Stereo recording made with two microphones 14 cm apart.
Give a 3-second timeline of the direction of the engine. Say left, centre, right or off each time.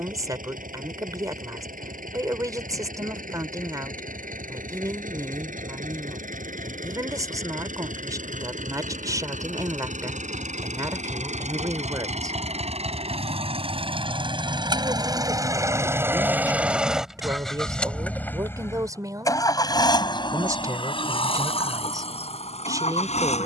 right, right, right, right, right, centre, left, left.